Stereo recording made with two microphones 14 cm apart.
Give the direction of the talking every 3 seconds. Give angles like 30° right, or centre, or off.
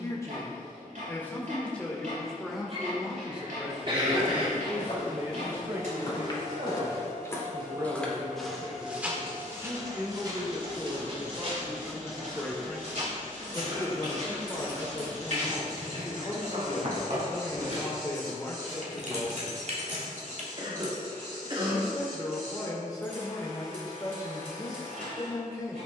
10° left, 20° right, 30° right, 20° right, 20° left, 30° left, 30° left, 30° left, 30° left.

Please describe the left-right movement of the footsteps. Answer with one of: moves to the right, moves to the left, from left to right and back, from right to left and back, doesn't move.
moves to the right.